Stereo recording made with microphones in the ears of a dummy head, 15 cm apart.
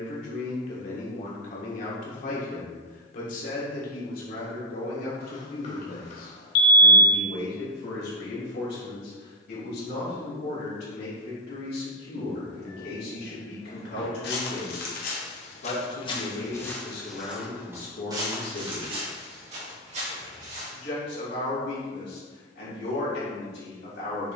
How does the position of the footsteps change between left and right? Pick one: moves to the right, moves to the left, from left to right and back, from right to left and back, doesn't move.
moves to the right.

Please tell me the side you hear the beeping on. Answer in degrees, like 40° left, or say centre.
40° left.